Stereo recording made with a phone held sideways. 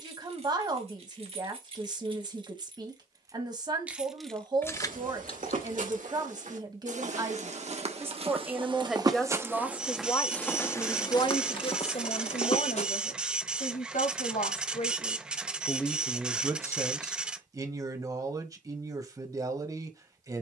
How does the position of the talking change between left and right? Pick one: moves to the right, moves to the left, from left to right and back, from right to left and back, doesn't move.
from right to left and back.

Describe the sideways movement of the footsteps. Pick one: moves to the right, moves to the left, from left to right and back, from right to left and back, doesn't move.
moves to the left.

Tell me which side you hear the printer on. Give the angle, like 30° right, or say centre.
10° right.